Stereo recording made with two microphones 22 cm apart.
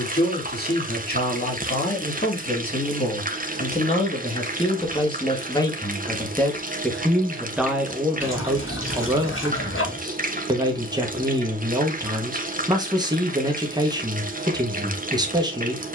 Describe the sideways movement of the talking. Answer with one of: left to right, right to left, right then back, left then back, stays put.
left to right.